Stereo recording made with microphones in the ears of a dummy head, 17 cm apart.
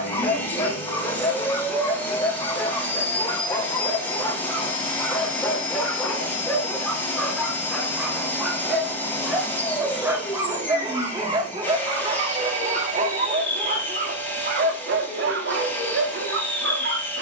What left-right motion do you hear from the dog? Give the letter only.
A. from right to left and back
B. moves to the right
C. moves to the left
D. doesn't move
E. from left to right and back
B.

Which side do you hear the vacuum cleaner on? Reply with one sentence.
You can hear the vacuum cleaner in the centre.